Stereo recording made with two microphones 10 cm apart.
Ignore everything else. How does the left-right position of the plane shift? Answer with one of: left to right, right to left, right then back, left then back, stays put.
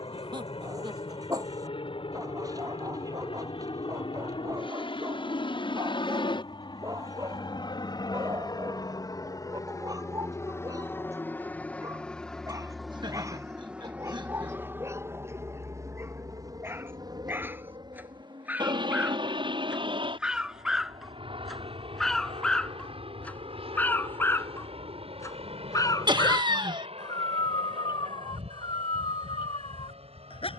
left to right.